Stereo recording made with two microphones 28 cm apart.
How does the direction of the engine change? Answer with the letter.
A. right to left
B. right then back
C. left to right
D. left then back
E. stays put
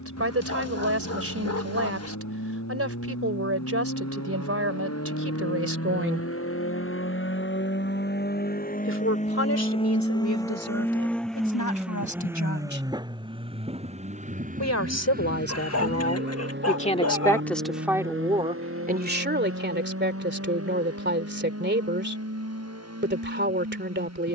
C.